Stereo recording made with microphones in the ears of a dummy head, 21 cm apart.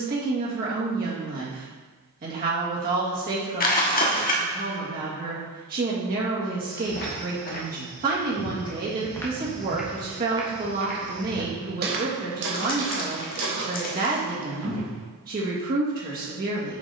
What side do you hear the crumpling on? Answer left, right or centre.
left.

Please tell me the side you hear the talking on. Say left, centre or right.
right.